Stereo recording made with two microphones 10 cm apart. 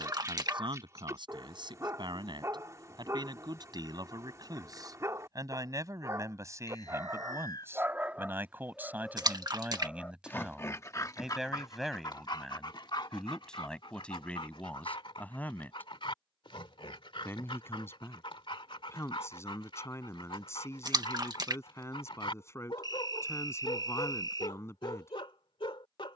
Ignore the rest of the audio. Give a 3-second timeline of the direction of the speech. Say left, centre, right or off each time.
right, right, right, centre, centre, left, left, left, left.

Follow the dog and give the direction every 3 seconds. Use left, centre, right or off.
right, right, right, left, left, left, left, left, left.